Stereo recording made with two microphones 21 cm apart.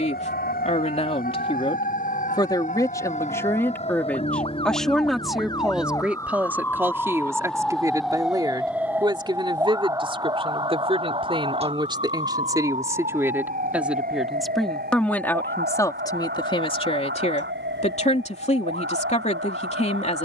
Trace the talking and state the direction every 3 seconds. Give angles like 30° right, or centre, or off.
30° left, 10° left, 10° right, 20° right, 10° right, 20° left, 30° left.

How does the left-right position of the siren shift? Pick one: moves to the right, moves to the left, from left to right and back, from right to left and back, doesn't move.
moves to the right.